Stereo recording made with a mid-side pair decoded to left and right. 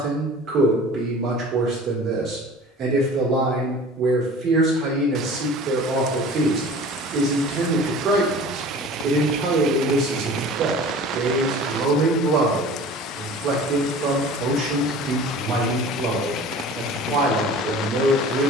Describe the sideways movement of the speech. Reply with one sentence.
You can hear the speech stay in one place.